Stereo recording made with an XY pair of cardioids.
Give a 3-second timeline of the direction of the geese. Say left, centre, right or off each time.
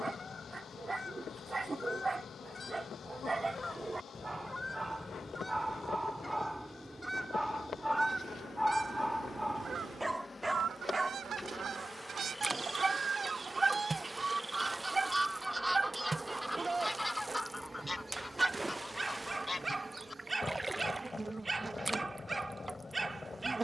left, left, centre, right, right, centre, left, left.